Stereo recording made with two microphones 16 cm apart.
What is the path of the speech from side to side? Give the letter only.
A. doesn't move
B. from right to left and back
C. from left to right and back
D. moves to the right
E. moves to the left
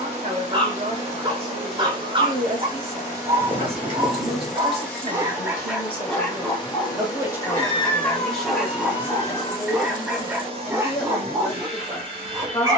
E.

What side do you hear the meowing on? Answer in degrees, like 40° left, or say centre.
30° left.